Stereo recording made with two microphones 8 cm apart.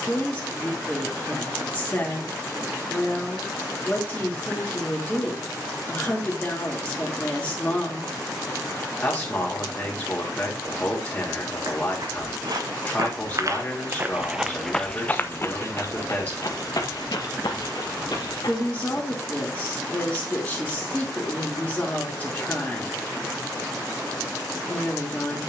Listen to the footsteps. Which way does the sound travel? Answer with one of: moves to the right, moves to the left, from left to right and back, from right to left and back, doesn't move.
moves to the left.